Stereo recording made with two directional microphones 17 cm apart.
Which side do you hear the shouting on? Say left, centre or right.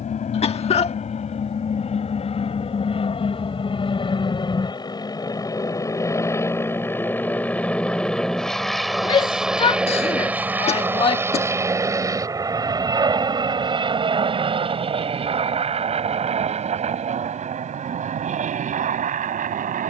left.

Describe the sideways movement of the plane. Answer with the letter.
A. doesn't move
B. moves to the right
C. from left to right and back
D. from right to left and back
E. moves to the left
B.